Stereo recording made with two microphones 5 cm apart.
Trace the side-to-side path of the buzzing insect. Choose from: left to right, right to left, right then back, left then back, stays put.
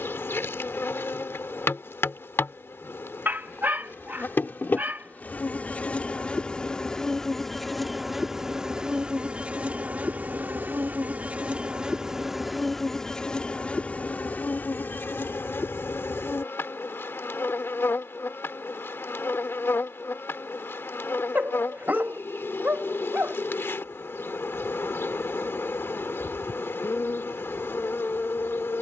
right then back.